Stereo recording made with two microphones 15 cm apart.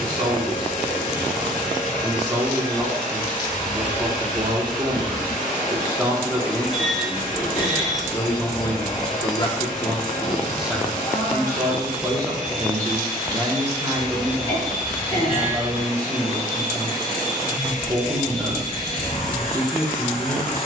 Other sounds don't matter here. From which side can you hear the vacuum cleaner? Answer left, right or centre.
left.